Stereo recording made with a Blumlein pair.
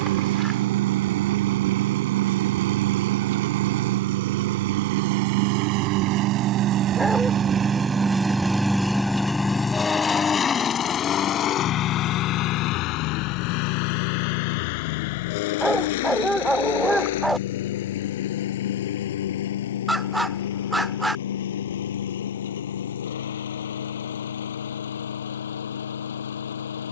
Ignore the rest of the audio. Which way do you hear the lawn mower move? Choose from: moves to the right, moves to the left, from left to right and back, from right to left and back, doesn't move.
moves to the left.